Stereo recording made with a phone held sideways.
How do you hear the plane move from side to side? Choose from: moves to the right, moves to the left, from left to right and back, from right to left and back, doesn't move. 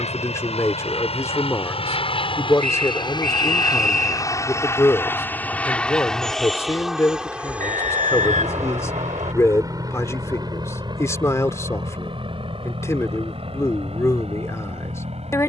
moves to the right.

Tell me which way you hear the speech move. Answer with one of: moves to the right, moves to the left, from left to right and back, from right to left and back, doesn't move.
doesn't move.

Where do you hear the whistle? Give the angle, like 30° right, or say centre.
70° right.